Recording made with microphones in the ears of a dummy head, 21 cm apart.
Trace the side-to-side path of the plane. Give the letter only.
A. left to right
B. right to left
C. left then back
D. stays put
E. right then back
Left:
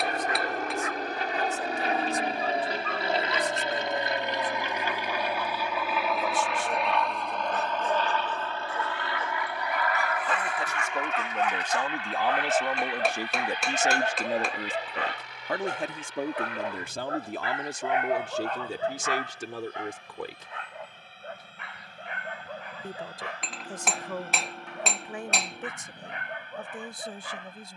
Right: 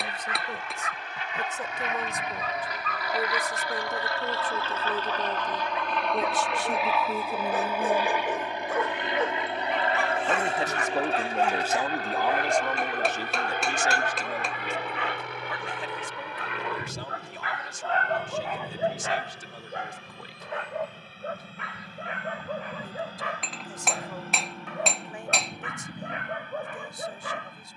A.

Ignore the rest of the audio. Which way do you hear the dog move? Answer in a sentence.
You can hear the dog go left and come back.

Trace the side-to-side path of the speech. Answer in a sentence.
In this clip you hear the speech move from right to left.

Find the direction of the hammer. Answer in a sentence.
You can hear the hammer in the centre.